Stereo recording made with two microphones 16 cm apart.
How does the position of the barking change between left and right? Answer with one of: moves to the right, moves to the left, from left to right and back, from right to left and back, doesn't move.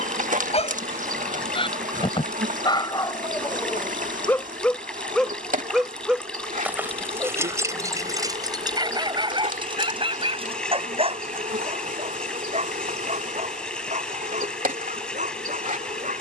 moves to the right.